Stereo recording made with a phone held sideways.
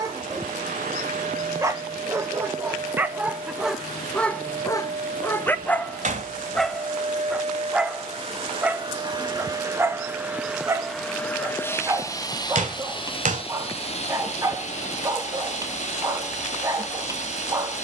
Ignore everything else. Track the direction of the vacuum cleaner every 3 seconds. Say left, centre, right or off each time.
right, right, right, centre, left, left.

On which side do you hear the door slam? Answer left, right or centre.
right.